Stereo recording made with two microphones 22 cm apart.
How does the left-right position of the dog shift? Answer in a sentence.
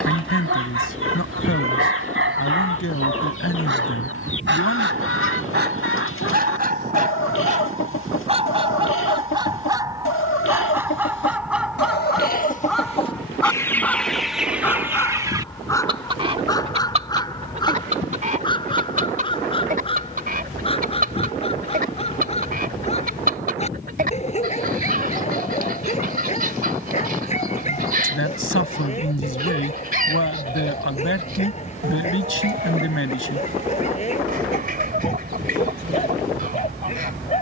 You can hear the dog go from the right side to the left.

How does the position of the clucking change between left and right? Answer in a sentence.
You can hear the clucking move to the right.